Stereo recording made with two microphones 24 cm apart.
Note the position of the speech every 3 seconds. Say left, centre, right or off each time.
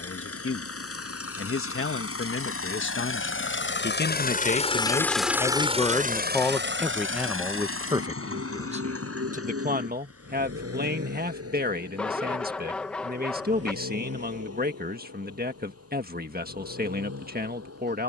left, left, centre, right, right, right.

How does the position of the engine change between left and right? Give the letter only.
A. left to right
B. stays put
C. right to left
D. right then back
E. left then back
A.